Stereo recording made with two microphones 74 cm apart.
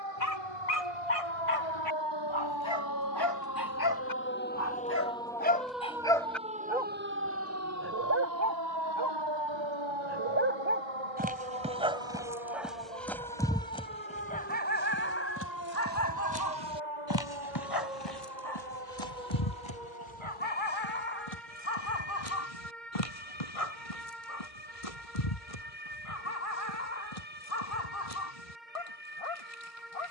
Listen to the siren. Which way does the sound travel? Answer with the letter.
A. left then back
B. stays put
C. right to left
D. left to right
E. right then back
D.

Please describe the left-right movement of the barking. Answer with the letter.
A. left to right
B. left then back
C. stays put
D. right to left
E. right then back
E.